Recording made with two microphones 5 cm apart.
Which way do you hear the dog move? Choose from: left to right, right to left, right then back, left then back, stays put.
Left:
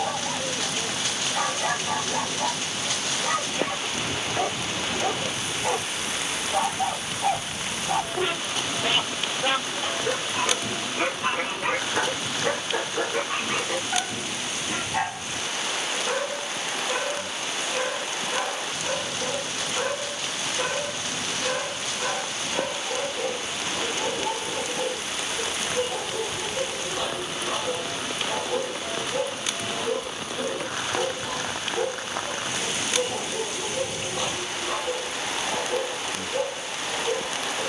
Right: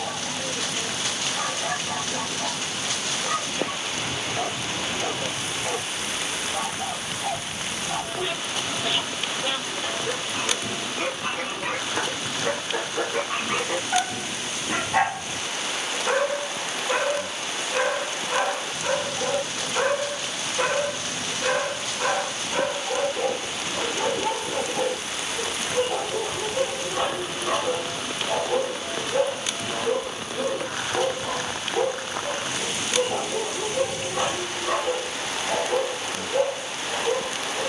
left to right.